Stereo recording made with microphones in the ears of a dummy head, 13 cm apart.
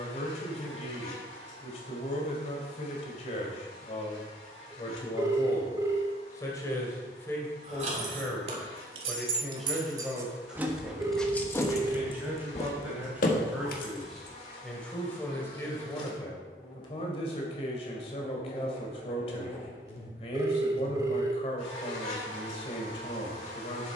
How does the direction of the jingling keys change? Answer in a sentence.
You can hear the jingling keys go from the right side to the left.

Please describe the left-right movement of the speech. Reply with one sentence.
You can hear the speech go right and come back.